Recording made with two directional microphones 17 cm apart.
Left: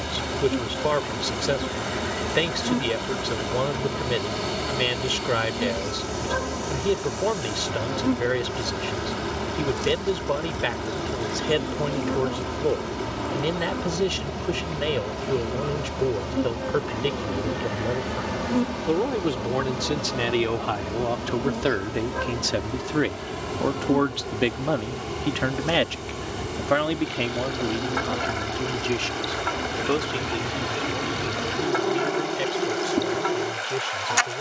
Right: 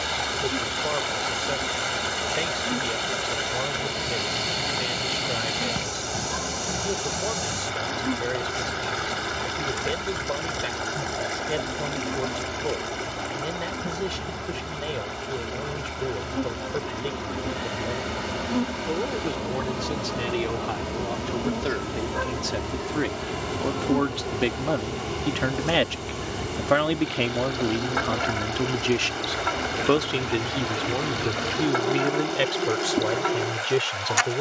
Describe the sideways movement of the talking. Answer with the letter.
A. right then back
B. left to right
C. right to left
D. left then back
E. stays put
B.